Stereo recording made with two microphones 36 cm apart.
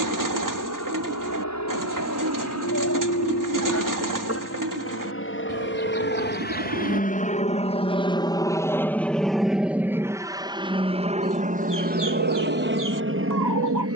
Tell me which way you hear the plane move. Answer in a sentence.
In this clip you hear the plane go from the left side to the right.